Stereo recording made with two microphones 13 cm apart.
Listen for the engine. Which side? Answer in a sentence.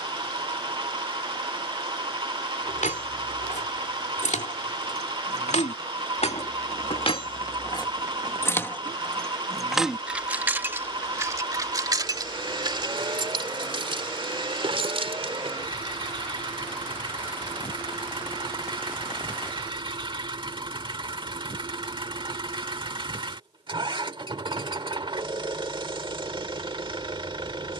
You can hear the engine on the right.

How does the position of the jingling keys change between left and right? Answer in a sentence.
You can hear the jingling keys move to the right.